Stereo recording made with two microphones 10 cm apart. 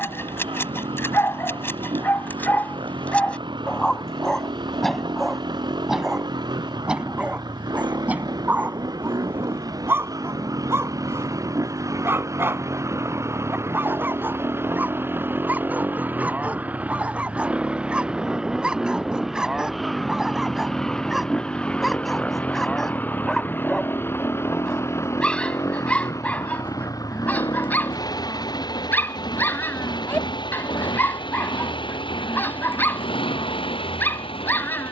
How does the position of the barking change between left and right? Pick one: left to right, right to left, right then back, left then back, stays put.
right then back.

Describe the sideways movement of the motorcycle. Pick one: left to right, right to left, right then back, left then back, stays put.
right to left.